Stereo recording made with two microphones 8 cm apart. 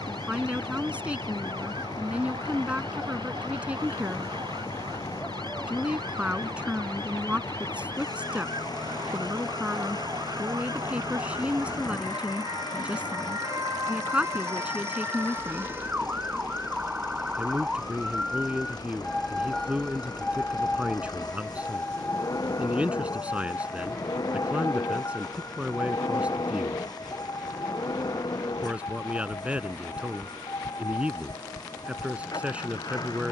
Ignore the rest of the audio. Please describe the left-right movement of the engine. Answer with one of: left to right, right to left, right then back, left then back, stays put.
stays put.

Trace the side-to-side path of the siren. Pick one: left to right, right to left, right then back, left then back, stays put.
right to left.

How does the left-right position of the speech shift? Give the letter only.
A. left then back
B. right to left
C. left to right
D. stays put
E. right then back
D.